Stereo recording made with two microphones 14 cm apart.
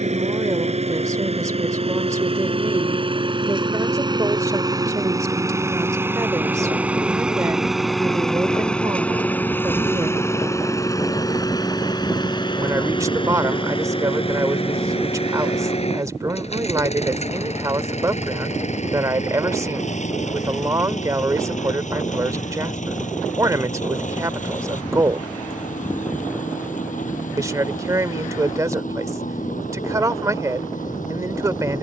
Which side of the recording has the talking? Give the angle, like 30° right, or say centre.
20° right.